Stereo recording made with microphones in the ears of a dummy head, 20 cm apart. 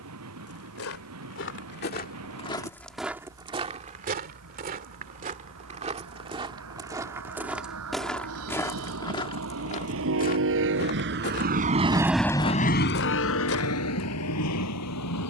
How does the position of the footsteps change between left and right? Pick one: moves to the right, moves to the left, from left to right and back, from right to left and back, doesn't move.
from left to right and back.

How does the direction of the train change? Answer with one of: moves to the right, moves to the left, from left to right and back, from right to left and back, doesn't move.
moves to the left.